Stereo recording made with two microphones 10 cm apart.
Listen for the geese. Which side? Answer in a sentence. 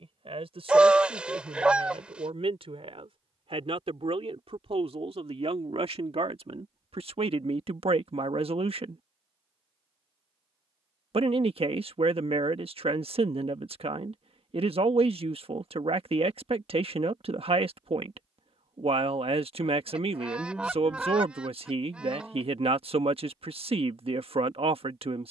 In this clip you hear the geese in the centre.